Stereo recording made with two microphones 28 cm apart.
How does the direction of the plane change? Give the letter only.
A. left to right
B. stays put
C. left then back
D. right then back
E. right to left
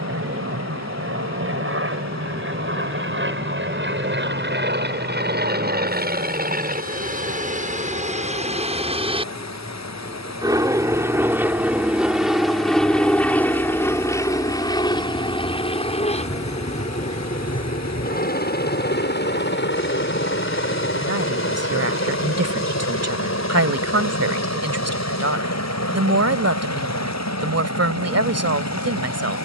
E.